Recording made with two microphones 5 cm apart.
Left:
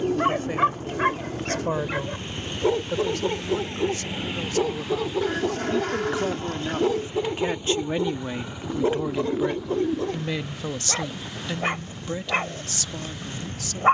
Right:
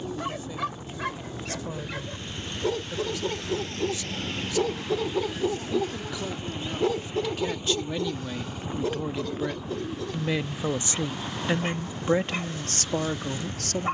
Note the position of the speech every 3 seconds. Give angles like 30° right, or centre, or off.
60° left, 50° left, 30° left, 10° right, 50° right.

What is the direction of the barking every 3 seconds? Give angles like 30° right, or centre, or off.
40° left, 10° left, 20° left, 40° left, 50° left.